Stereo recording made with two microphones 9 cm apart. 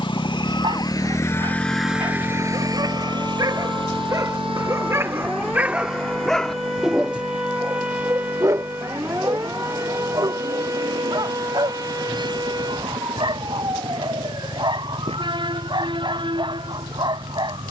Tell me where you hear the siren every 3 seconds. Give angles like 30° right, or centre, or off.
40° left, 20° left, 10° right, 30° right, 50° right, 60° right.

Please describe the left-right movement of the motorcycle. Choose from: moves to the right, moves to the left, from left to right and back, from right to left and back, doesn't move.
moves to the right.